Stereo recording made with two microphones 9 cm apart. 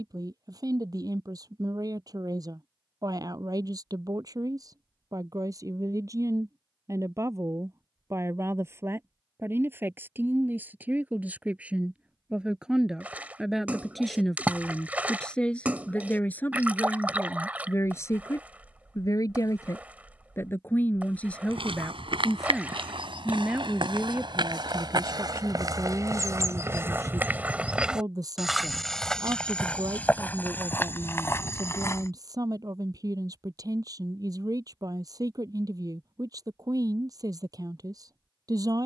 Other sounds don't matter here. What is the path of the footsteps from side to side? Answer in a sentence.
In this clip you hear the footsteps move from right to left.